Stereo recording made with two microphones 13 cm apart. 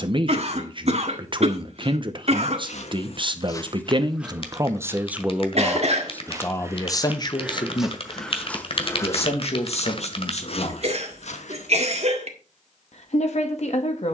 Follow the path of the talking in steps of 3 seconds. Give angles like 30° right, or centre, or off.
40° right, 20° right, 30° left, 50° left, 60° left.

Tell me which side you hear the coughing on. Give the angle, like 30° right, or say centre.
50° right.